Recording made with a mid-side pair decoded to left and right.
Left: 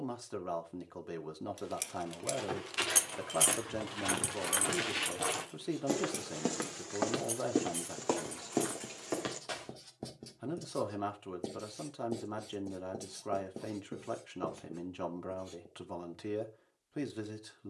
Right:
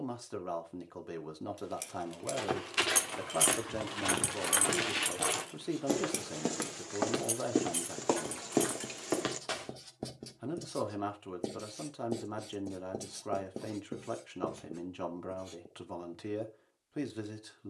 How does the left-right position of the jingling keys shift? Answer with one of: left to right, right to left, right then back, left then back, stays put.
left to right.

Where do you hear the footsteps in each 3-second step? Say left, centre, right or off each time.
right, right, centre, right, off, off.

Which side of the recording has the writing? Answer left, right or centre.
right.